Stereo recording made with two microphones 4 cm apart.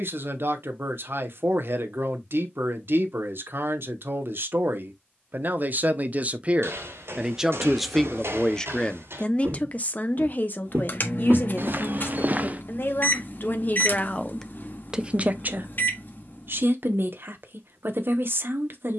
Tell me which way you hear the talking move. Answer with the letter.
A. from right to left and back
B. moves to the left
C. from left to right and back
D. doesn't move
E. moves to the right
A.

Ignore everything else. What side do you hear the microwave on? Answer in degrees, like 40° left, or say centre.
50° left.